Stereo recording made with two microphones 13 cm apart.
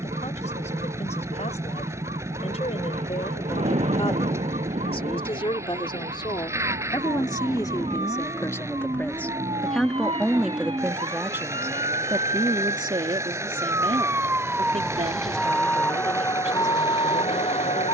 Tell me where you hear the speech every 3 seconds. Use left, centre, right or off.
left, left, left, centre, right, right.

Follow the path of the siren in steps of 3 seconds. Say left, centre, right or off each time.
right, right, right, right, right, left.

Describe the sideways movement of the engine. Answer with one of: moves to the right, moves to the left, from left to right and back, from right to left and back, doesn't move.
doesn't move.